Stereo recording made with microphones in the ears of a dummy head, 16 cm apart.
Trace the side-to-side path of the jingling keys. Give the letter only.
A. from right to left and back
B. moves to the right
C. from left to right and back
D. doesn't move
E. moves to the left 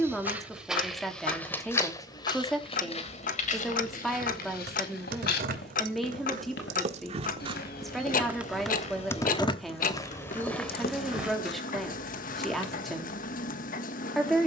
E.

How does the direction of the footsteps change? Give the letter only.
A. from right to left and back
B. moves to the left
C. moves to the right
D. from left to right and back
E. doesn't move
A.